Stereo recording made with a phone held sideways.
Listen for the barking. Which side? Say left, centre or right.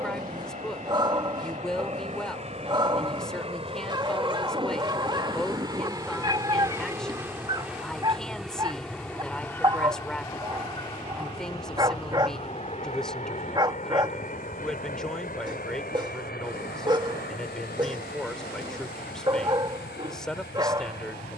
right.